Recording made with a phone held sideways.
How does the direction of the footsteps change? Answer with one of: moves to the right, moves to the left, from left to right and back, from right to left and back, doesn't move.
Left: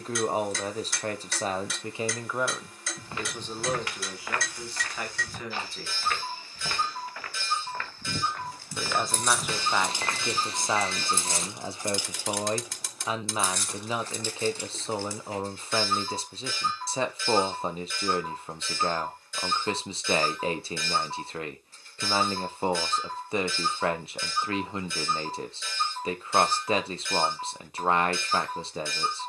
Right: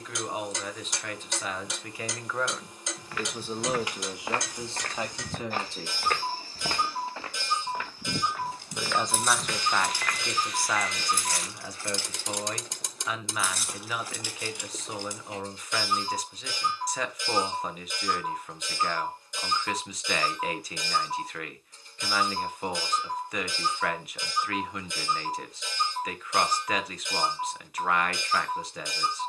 from left to right and back.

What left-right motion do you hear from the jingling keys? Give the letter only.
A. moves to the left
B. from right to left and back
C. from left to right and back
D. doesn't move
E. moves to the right
B.